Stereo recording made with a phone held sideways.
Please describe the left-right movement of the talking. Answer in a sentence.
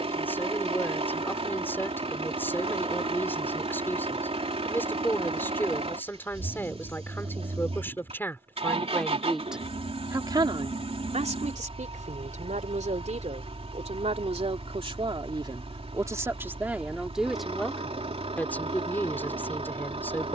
In this clip you hear the talking move from left to right and back again.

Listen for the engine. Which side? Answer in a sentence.
You can hear the engine on the right.